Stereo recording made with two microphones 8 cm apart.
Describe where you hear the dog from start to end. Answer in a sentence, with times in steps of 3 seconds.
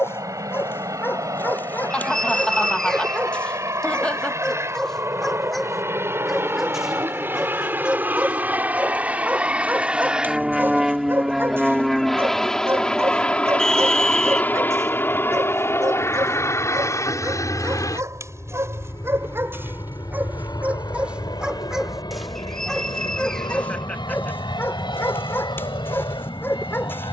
You can hear the dog on the left from 0 s, in the centre from 3 s, on the right from 9 s, in the centre from 21 s and on the left from 24 s.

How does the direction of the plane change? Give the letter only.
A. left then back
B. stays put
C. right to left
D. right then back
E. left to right
C.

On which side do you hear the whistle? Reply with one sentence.
In this clip you hear the whistle in the centre.